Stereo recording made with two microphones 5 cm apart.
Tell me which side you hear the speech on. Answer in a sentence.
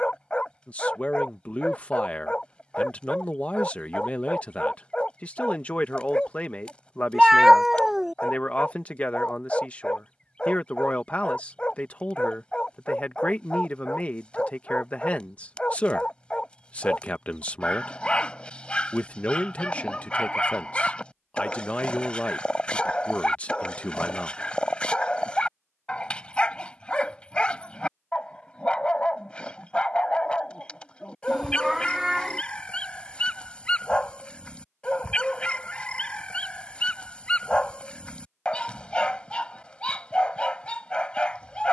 You can hear the speech on the left.